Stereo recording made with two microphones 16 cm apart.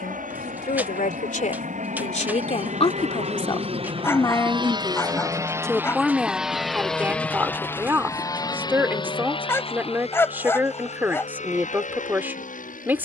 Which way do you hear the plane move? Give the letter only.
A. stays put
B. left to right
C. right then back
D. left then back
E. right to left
E.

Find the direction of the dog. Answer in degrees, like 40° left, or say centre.
10° left.